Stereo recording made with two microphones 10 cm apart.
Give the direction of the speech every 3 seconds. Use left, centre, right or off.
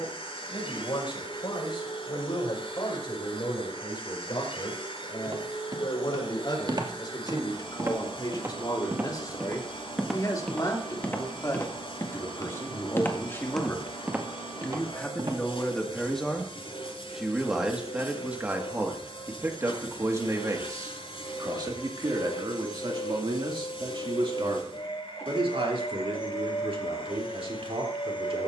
left, left, left, left, left, centre, right, right, right, right.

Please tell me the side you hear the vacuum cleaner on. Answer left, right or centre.
left.